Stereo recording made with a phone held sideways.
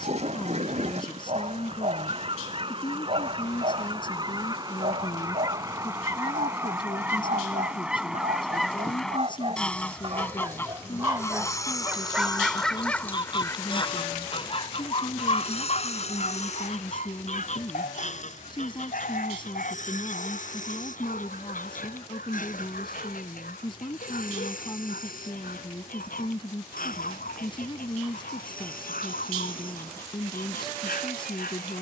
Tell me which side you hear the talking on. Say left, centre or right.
left.